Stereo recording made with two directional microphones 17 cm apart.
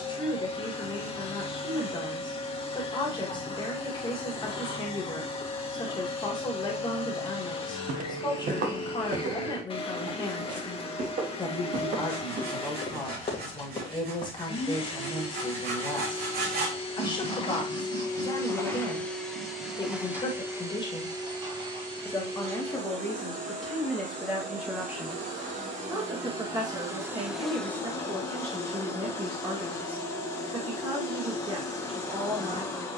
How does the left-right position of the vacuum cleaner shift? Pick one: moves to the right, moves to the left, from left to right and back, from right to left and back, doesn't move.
from left to right and back.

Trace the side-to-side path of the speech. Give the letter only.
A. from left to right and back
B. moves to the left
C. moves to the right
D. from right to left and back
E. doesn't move
C.